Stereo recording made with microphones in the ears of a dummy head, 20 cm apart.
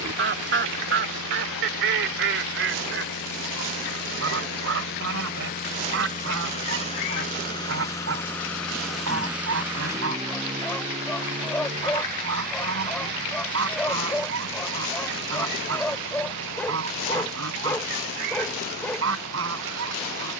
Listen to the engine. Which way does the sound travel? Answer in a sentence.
You can hear the engine go from the left side to the right.